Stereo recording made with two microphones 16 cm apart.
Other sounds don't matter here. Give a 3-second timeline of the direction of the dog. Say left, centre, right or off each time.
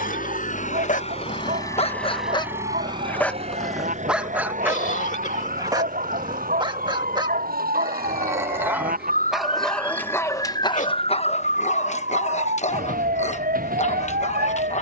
left, centre, right, left, left.